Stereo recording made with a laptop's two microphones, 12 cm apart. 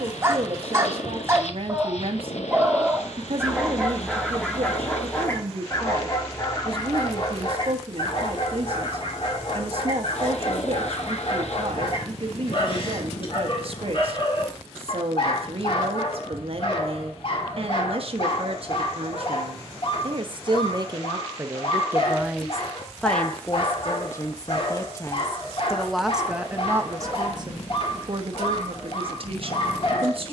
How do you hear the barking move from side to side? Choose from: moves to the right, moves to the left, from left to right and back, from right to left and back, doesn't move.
moves to the left.